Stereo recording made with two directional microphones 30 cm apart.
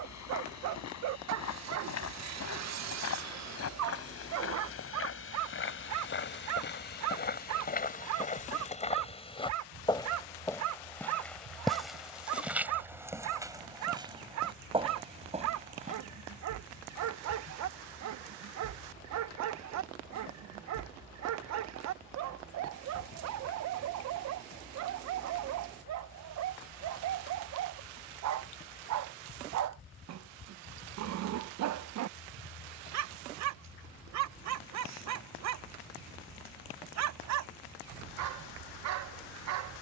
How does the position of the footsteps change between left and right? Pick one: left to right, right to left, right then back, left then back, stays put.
left to right.